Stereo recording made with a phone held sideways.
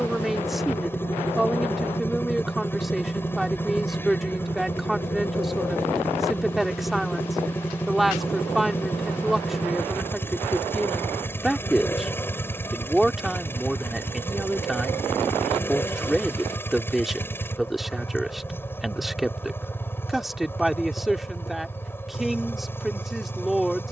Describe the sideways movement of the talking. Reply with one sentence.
You can hear the talking stay in one place.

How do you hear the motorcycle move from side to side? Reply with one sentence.
You can hear the motorcycle stay put.